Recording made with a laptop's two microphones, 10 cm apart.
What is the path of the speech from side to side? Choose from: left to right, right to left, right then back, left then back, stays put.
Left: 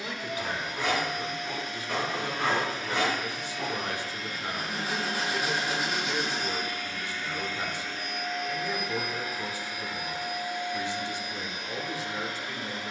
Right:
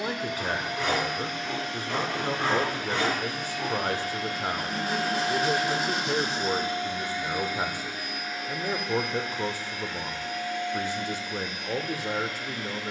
stays put.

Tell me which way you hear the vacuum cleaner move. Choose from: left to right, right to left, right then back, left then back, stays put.
right to left.